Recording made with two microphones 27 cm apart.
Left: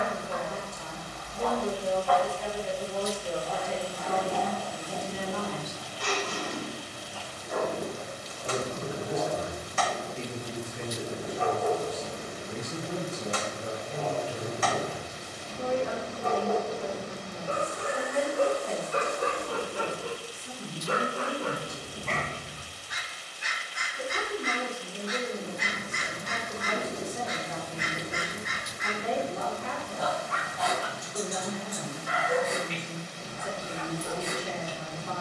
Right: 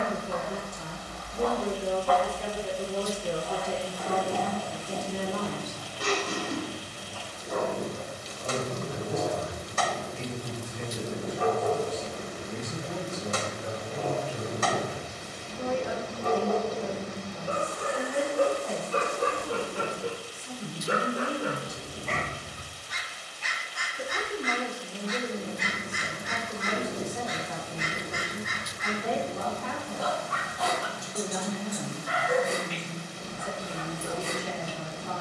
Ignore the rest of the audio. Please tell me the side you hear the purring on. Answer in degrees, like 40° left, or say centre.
50° right.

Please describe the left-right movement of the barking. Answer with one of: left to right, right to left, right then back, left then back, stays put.
left then back.